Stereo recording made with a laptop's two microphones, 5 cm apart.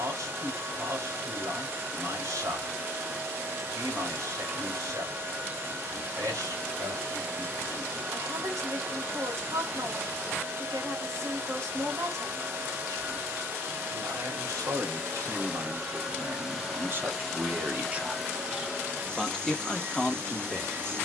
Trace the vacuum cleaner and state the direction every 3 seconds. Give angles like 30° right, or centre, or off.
40° right, 40° right, 40° right, 40° right, 40° right, 10° right, 30° right.